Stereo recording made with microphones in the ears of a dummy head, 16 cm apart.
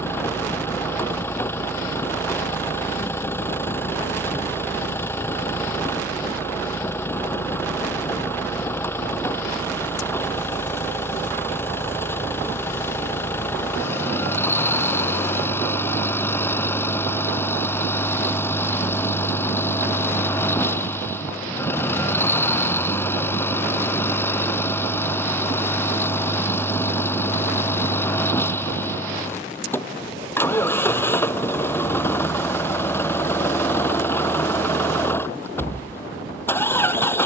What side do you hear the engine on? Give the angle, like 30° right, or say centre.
10° left.